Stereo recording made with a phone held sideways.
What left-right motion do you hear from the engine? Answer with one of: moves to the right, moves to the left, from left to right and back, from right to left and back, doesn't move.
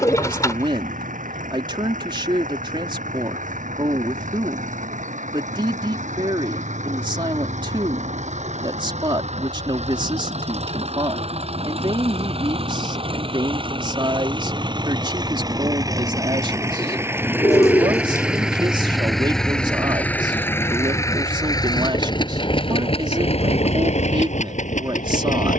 moves to the left.